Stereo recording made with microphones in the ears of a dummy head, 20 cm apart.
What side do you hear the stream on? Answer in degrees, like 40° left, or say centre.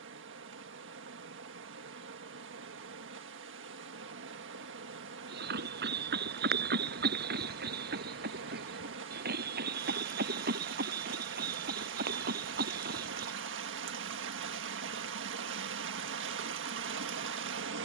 50° right.